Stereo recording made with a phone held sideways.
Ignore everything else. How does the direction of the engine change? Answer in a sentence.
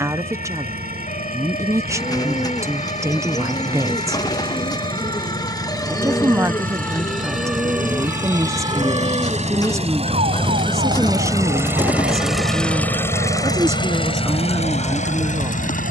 In this clip you hear the engine move from right to left.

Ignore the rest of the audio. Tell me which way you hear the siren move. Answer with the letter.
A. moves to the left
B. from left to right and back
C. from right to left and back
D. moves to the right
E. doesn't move
D.